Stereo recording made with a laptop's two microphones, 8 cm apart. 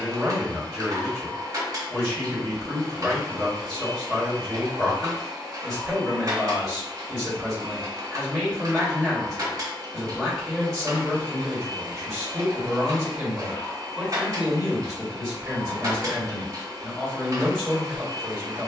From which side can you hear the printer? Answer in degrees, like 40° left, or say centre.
50° right.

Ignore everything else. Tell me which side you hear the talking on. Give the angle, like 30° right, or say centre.
10° right.